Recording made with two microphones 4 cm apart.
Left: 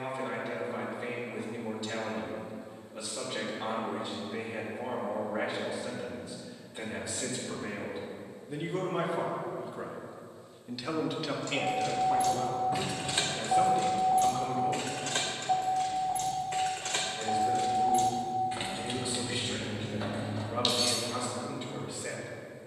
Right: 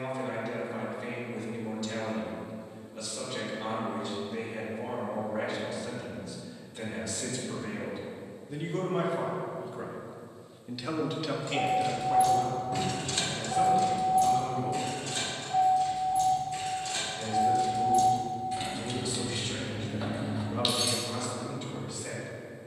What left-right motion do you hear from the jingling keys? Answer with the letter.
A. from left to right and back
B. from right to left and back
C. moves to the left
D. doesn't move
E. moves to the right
B.